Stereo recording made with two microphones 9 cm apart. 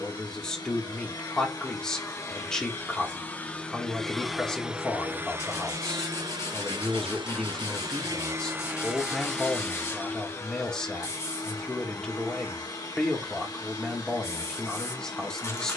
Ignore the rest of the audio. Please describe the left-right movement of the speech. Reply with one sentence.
In this clip you hear the speech stay in one place.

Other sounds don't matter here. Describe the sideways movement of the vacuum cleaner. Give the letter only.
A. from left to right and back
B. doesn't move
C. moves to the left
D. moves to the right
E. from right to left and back
A.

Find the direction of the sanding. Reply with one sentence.
In this clip you hear the sanding on the left.